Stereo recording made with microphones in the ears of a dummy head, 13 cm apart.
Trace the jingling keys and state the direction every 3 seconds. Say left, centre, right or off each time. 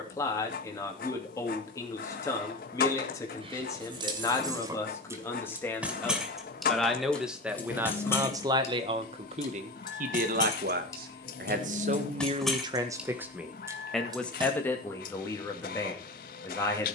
off, right, centre, left, centre, off.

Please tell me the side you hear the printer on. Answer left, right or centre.
left.